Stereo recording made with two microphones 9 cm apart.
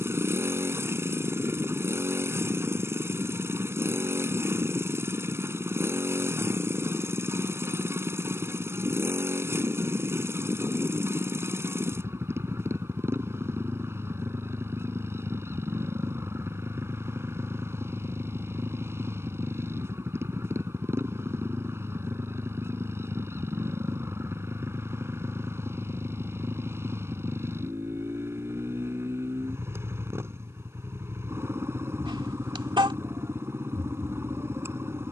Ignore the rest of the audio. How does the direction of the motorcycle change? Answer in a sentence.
You can hear the motorcycle stay put.